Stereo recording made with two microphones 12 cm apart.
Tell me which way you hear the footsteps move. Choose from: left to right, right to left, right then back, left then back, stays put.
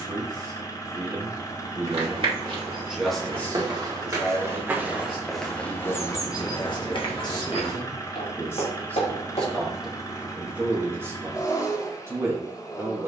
right to left.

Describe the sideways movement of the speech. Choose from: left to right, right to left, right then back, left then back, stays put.
left then back.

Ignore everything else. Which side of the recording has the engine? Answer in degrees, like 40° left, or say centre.
30° left.